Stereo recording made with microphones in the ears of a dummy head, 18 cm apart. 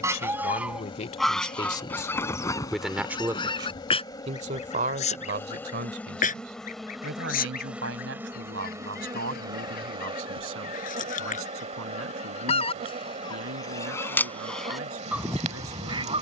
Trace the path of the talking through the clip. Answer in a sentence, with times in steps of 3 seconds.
In this clip you hear the talking on the left from 0 s and on the right from 3 s.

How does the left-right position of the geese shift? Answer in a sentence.
You can hear the geese move from right to left and back again.